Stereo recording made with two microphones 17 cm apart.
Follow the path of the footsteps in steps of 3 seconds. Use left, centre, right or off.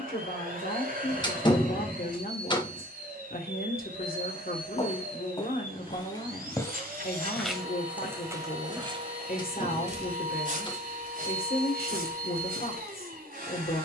off, left, centre, right, right.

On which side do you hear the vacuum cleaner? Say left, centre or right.
right.